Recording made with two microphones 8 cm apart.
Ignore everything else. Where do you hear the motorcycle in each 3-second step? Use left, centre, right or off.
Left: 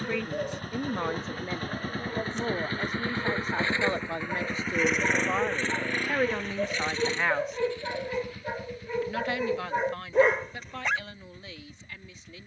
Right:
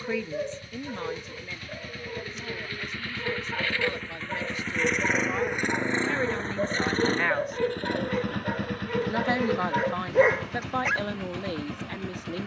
left, centre, right, right.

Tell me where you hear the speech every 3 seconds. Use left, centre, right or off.
left, left, centre, right.